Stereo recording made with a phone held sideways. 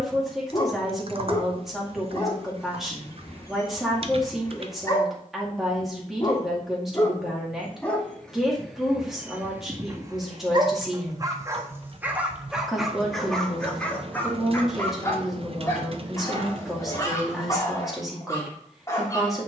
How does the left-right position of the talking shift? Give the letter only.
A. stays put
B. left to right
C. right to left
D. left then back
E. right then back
A.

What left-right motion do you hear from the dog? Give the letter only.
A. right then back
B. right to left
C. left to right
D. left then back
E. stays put
A.